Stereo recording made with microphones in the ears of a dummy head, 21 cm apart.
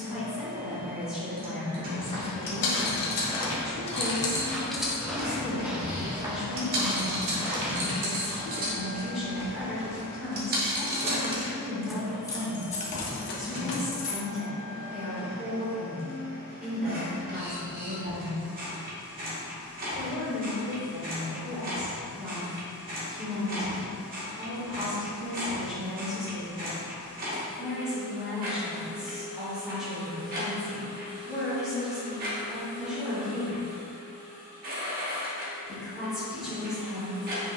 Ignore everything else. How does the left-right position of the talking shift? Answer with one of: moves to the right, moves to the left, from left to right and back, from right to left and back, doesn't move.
doesn't move.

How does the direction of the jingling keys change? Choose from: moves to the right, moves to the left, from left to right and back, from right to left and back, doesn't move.
from left to right and back.